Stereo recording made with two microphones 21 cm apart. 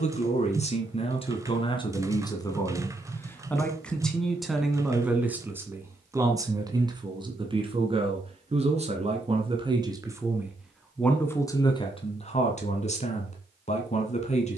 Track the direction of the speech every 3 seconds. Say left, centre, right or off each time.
left, centre, right, centre, left.